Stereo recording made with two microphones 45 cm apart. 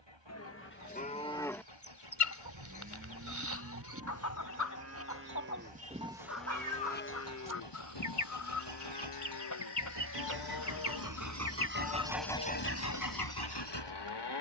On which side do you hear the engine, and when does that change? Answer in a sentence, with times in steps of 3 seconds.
You can hear the engine on the right from 0 s and on the left from 12 s.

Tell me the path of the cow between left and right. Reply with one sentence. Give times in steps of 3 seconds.
In this clip you hear the cow in the centre from 0 s, on the right from 3 s and on the left from 6 s.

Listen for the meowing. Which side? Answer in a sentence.
In this clip you hear the meowing on the right.